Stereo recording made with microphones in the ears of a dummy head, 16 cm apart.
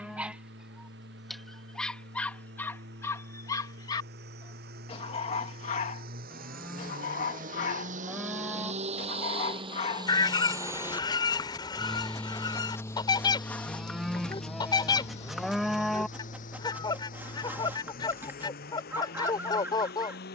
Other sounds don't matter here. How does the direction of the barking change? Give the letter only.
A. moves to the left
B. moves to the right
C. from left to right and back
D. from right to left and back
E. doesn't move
D.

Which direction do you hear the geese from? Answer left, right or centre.
left.